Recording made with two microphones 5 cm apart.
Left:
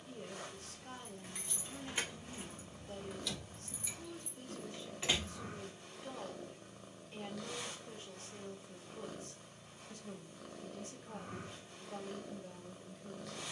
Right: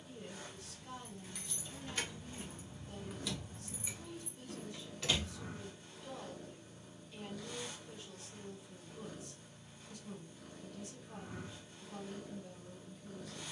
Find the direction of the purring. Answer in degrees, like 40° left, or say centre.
60° left.